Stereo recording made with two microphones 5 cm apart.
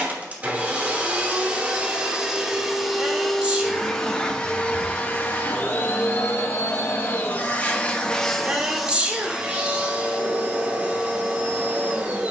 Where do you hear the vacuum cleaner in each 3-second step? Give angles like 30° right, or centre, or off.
20° right, 20° left, 30° left, 20° right.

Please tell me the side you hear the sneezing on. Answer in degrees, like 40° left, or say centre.
20° right.